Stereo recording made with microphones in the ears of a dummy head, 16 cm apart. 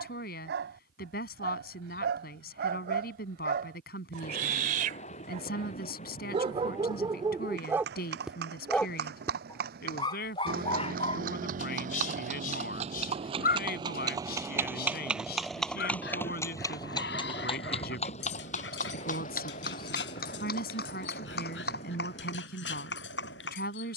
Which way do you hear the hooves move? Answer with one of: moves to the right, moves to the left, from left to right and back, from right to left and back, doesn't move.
moves to the left.